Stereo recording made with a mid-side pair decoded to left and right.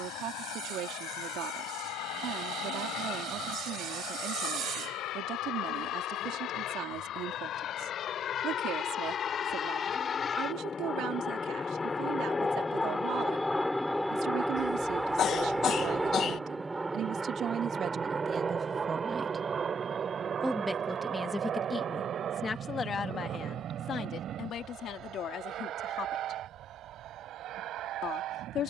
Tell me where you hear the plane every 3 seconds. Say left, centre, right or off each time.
left, left, left, left, centre, centre, right, right, right, right.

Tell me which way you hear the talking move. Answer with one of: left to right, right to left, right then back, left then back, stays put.
right to left.